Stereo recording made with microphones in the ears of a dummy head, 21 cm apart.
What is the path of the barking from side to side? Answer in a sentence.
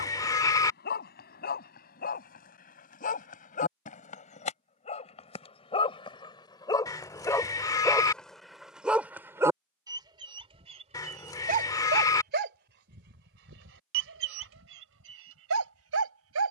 In this clip you hear the barking go from the left side to the right.